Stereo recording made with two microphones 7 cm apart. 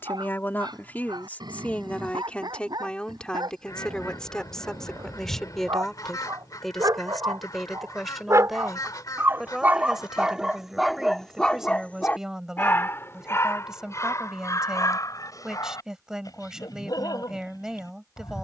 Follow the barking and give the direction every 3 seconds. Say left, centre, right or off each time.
right, right, right, centre, left, left.